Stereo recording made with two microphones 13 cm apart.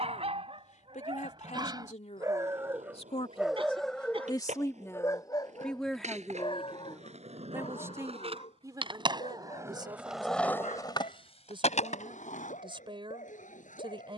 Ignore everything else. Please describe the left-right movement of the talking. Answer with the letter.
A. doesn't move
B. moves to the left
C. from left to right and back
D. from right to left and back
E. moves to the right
E.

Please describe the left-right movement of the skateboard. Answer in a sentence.
In this clip you hear the skateboard move to the left.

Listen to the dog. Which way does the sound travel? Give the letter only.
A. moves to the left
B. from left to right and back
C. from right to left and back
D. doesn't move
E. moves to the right
A.